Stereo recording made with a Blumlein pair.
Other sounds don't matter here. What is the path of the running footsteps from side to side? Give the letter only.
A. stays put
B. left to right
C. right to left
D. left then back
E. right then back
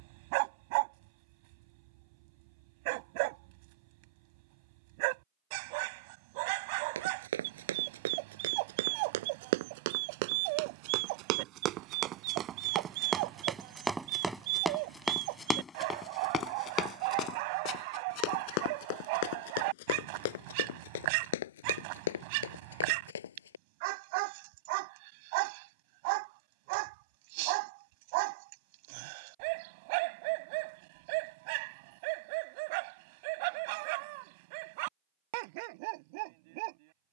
C.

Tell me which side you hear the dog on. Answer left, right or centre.
right.